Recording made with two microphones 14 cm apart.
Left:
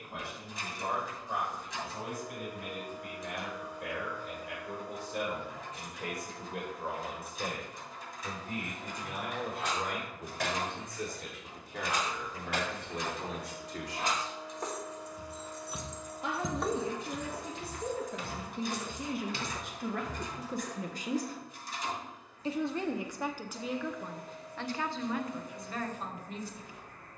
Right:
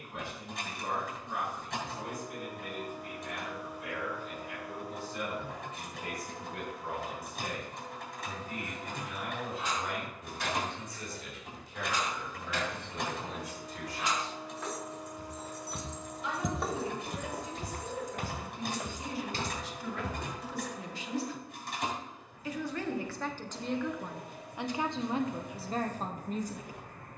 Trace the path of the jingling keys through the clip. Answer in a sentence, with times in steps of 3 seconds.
In this clip you hear the jingling keys not at all from 0 s, on the left from 6 s, in the centre from 15 s, on the right from 18 s and not at all from 21 s.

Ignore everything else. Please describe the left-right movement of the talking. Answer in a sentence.
In this clip you hear the talking go from the left side to the right.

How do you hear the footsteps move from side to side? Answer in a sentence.
In this clip you hear the footsteps move from left to right.